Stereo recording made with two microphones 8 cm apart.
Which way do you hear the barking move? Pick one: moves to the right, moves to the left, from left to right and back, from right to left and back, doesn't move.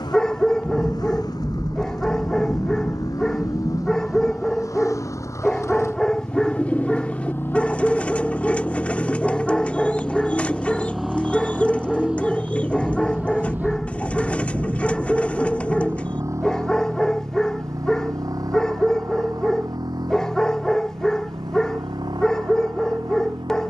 doesn't move.